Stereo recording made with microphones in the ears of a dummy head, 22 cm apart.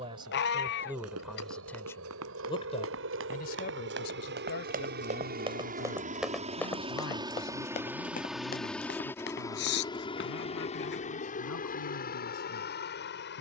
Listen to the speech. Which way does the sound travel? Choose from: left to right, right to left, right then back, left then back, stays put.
right to left.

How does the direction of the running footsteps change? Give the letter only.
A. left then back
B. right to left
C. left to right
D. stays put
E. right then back
B.